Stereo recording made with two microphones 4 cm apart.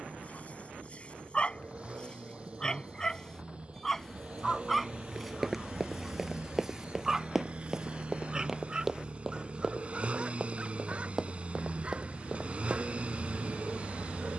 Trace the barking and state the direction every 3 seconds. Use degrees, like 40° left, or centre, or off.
30° left, centre, 10° right, 30° right, 30° right.